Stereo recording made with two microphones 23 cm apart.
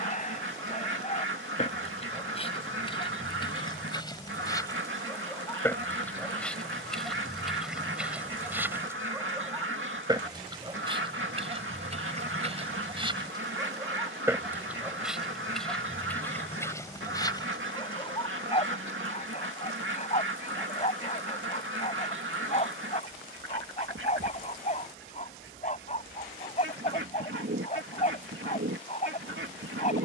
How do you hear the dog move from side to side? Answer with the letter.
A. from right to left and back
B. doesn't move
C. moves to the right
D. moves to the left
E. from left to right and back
E.